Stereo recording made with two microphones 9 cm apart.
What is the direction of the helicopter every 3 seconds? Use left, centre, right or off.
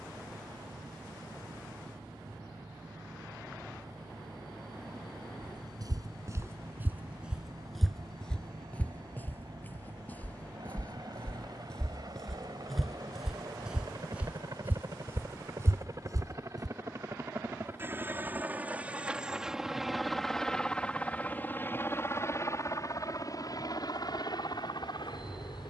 right, right, right, right, right, right, centre, left, left.